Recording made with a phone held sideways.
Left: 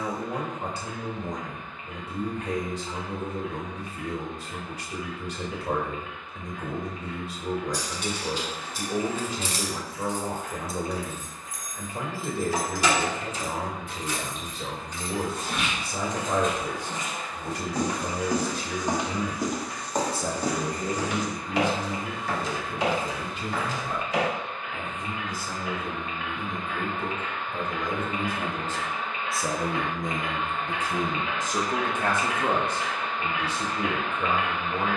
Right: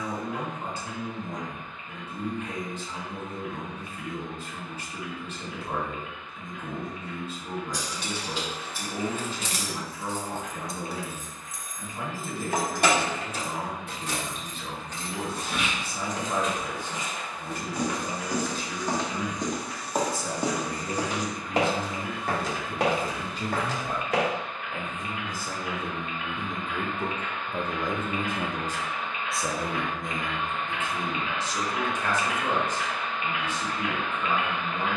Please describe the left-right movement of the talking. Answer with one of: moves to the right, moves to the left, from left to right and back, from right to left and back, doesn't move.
from left to right and back.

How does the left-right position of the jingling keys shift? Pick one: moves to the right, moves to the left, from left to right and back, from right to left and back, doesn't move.
moves to the right.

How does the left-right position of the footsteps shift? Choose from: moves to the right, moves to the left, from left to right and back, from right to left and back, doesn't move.
moves to the right.